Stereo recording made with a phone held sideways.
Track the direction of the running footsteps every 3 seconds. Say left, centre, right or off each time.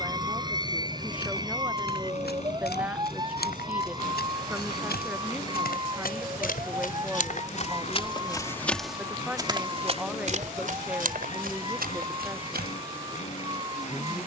left, left, left, right, right.